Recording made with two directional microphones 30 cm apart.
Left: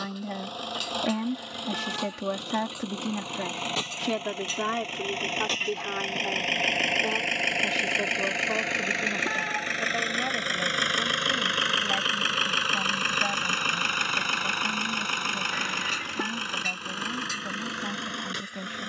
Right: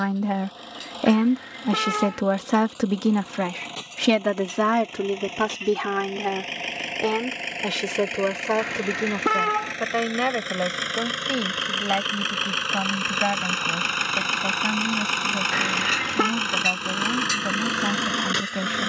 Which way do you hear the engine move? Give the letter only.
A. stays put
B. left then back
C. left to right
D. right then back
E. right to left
C.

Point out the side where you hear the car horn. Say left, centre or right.
right.